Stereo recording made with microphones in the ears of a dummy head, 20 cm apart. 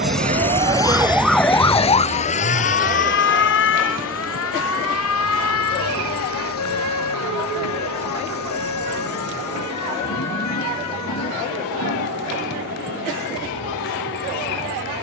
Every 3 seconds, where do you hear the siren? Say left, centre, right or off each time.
centre, left, left, left, left.